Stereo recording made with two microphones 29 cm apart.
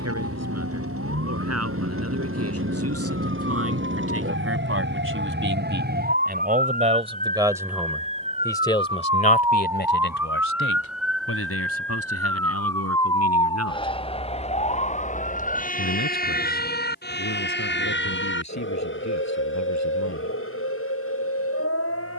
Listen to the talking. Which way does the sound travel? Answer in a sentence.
You can hear the talking travel towards the left.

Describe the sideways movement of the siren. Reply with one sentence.
In this clip you hear the siren travel towards the left.